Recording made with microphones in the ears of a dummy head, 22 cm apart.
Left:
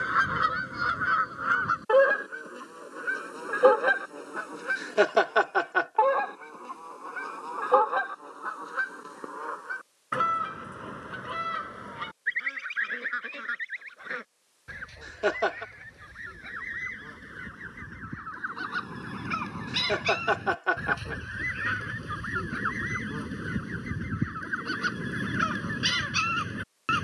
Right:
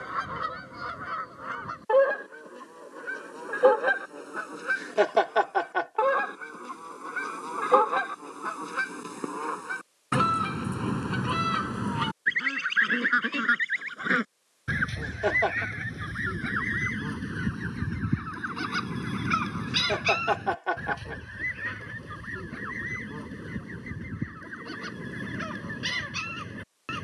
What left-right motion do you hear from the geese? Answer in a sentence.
You can hear the geese go right and come back.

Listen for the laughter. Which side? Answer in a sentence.
You can hear the laughter in the centre.